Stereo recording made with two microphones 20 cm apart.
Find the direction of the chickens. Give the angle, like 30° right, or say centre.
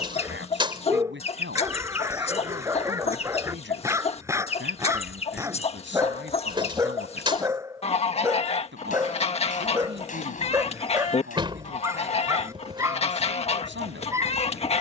30° left.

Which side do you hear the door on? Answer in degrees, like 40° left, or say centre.
20° right.